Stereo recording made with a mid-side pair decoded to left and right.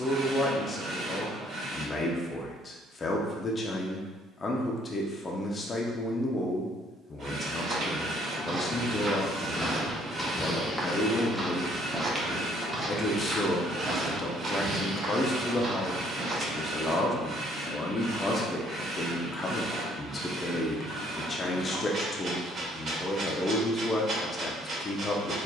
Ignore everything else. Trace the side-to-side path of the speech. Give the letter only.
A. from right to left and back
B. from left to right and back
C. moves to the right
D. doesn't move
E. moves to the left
D.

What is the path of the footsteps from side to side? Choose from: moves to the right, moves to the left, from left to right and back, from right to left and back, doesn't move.
from right to left and back.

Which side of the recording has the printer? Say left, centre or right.
right.